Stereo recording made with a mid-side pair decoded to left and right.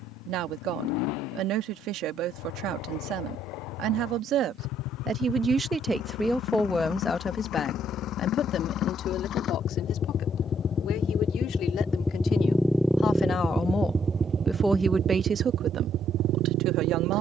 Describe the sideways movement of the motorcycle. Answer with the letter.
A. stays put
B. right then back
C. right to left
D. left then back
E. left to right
E.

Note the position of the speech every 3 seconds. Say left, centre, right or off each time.
right, right, left, left, left, right.